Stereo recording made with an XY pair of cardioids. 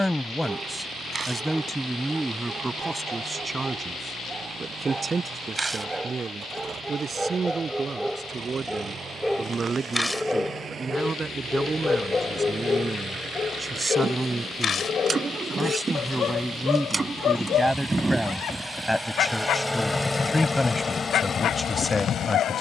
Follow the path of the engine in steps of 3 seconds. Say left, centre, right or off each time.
right, right, right, right, right, right, centre, left.